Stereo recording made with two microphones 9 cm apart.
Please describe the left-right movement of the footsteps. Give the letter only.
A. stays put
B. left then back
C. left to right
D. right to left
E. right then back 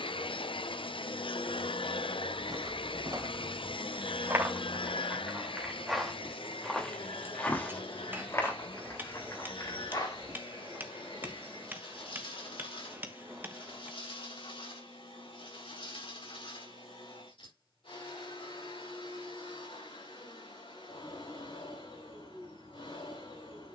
D.